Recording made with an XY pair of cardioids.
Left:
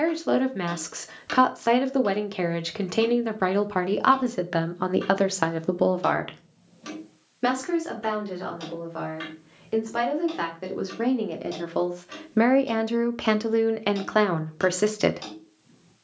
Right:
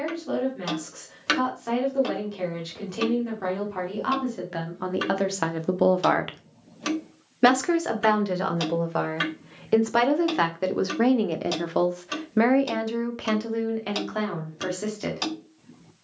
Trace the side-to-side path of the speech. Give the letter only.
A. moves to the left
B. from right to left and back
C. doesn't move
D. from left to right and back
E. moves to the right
D.